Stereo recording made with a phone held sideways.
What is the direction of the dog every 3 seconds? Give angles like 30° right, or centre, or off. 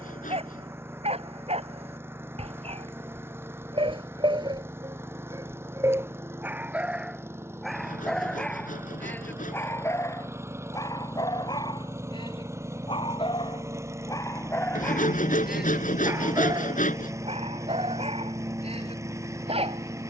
40° right, 30° right, centre, 20° left, 20° left, 20° right, 40° right.